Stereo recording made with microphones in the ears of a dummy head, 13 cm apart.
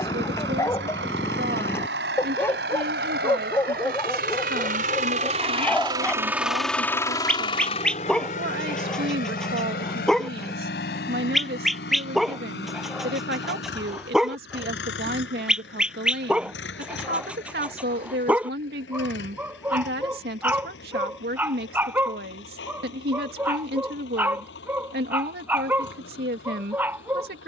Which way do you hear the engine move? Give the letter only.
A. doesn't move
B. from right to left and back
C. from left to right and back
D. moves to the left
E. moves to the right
D.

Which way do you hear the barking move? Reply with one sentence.
In this clip you hear the barking move to the right.